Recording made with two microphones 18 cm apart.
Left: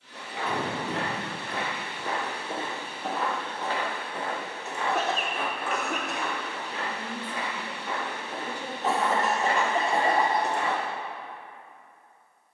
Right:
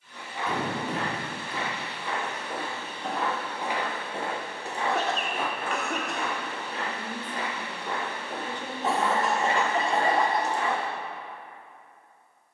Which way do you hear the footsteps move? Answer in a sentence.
You can hear the footsteps move from left to right and back again.